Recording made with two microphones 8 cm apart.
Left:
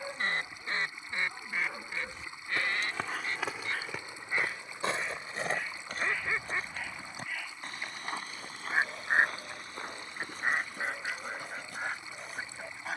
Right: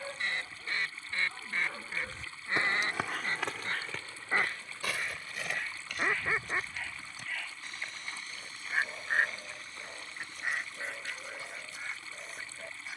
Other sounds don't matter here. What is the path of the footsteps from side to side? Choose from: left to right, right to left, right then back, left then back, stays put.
right to left.